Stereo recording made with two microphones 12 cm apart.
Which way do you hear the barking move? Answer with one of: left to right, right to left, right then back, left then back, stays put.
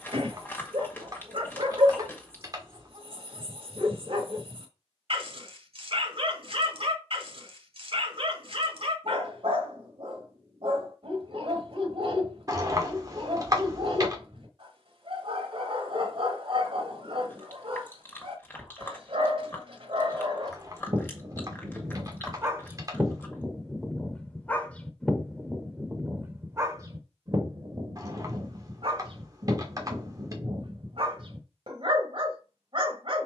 left then back.